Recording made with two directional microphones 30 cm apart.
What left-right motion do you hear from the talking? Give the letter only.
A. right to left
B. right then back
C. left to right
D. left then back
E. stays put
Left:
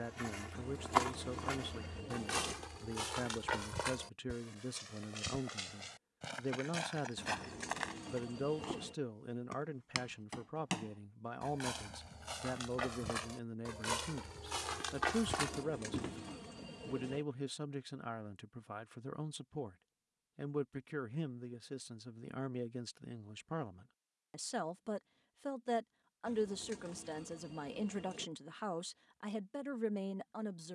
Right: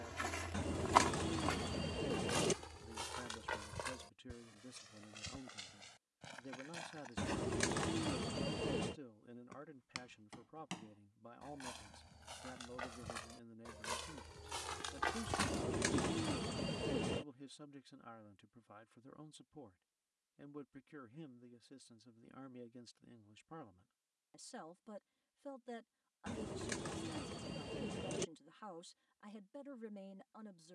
E.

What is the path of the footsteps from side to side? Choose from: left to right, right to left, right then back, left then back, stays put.
left then back.